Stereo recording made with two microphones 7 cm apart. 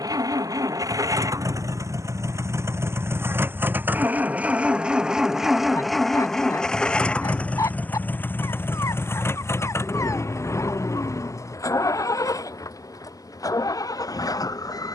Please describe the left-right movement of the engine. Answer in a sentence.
In this clip you hear the engine move to the left.